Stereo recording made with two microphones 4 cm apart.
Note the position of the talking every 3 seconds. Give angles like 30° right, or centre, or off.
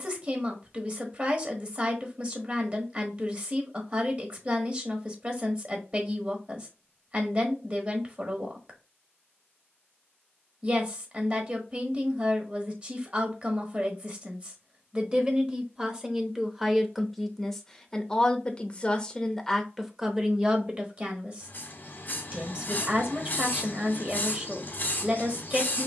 30° right, 30° right, 30° right, 30° right, 30° right, 10° right, centre, 30° right, 30° right.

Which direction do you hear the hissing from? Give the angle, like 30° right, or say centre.
40° left.